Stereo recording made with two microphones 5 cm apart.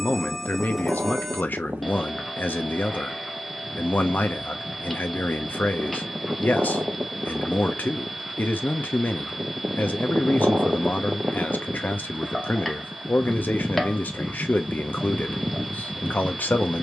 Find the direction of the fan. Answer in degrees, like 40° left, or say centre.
30° right.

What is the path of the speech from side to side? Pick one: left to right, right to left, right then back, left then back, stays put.
stays put.